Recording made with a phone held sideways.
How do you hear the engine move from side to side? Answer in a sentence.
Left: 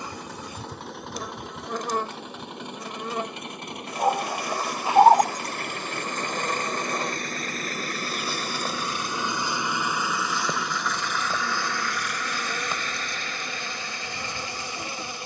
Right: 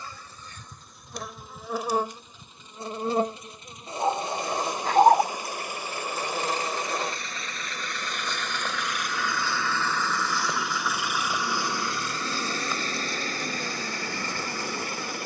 In this clip you hear the engine move to the right.